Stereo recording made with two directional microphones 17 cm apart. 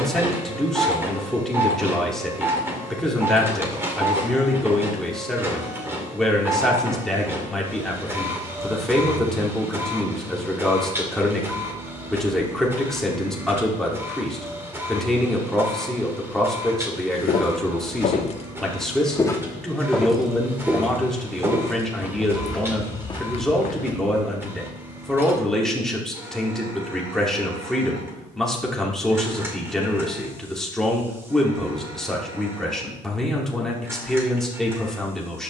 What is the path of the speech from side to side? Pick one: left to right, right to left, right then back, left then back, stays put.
stays put.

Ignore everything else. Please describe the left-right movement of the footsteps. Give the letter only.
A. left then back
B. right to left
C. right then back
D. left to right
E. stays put
C.